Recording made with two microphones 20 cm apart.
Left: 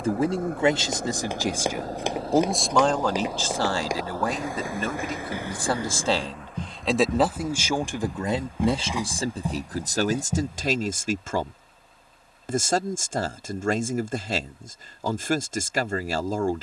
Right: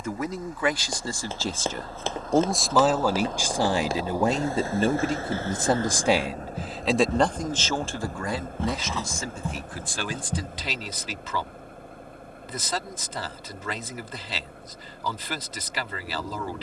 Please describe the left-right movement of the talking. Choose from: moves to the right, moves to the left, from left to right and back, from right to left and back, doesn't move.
from left to right and back.